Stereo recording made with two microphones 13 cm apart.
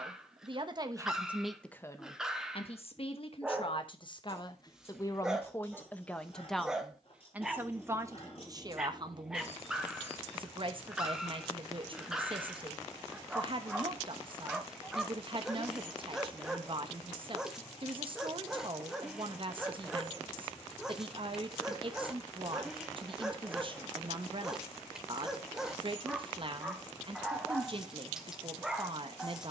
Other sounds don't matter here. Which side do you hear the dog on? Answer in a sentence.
You can hear the dog in the centre.